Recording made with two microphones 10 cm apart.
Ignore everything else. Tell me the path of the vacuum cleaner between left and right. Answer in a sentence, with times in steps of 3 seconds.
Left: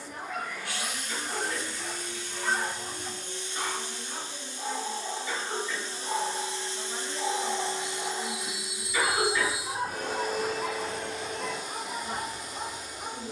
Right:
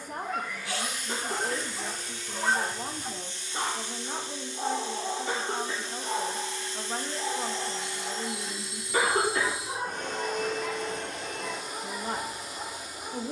You can hear the vacuum cleaner on the left from 0 s and in the centre from 9 s.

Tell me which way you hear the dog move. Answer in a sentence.
In this clip you hear the dog go from the right side to the left.